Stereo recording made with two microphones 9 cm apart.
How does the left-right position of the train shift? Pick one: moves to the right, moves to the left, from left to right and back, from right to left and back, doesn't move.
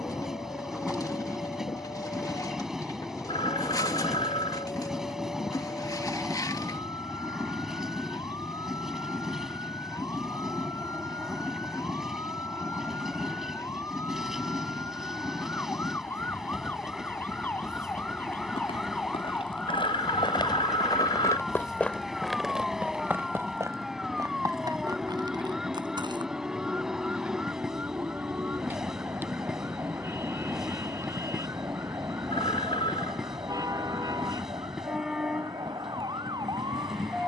doesn't move.